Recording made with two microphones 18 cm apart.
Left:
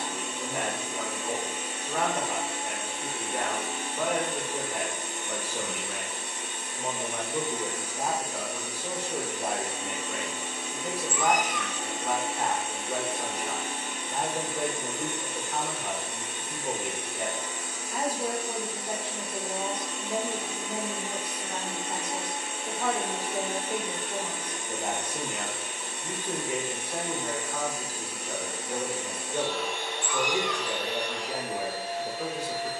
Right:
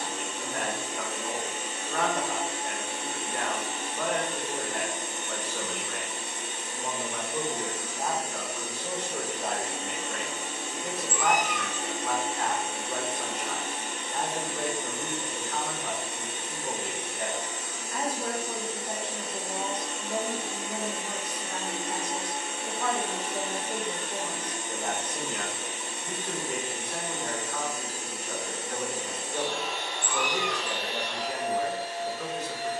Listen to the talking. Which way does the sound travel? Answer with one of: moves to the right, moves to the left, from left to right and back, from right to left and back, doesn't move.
doesn't move.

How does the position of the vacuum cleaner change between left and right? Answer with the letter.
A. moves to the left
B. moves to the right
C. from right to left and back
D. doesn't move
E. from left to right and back
D.